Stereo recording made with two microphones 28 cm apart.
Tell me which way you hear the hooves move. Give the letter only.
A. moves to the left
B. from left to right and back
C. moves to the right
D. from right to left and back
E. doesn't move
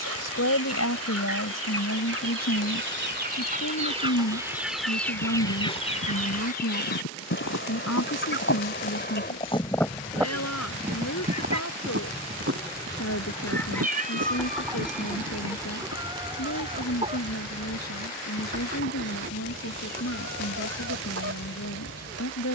C.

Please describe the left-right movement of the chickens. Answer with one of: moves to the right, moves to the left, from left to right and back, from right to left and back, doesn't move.
from right to left and back.